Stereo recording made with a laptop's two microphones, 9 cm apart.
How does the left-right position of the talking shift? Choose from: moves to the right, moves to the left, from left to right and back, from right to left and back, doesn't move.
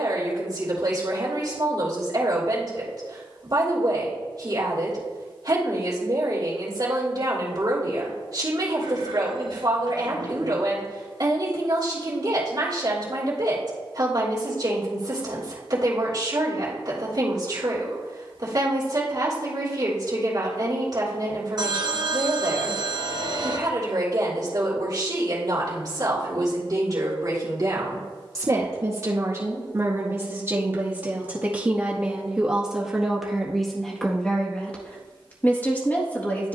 moves to the left.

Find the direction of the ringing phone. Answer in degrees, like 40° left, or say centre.
50° right.